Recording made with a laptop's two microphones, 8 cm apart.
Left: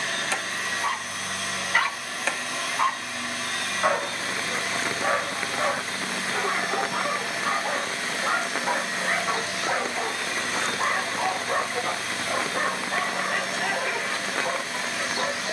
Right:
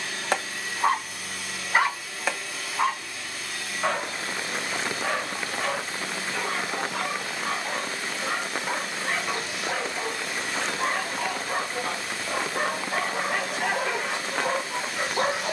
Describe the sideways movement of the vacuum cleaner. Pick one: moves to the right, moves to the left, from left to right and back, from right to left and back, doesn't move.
doesn't move.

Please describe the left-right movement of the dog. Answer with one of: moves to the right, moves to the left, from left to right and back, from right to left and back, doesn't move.
from right to left and back.